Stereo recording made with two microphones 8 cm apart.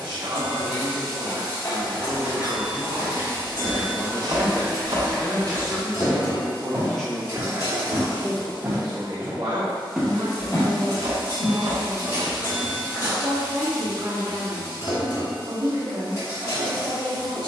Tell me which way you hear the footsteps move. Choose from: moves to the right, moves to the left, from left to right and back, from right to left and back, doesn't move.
from left to right and back.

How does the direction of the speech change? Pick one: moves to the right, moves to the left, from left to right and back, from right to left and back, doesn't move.
from right to left and back.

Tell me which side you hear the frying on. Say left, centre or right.
left.